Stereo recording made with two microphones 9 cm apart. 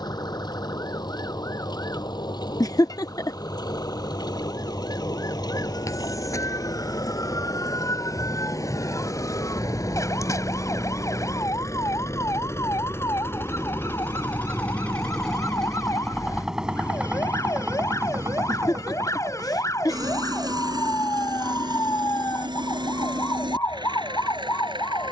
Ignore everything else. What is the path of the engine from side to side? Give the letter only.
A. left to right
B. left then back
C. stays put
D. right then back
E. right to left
A.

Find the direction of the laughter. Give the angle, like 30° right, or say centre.
50° left.